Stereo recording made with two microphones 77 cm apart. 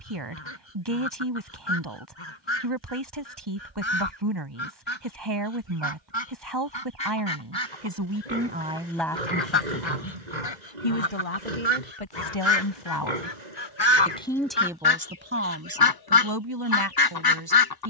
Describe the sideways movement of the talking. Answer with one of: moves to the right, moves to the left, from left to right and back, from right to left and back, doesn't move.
from right to left and back.